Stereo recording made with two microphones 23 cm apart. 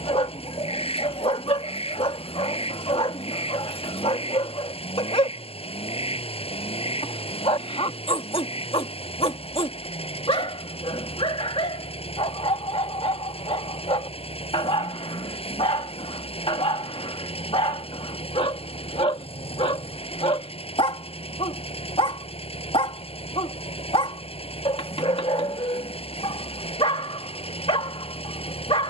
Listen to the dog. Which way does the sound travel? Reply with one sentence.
In this clip you hear the dog stay put.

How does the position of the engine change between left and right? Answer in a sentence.
In this clip you hear the engine stay put.